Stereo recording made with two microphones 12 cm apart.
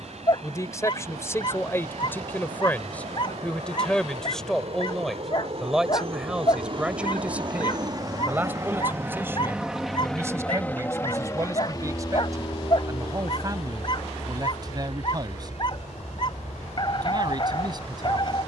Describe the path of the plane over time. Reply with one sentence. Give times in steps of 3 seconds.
You can hear the plane on the right from 0 s, in the centre from 9 s and on the left from 12 s.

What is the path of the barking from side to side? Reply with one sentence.
In this clip you hear the barking stay put.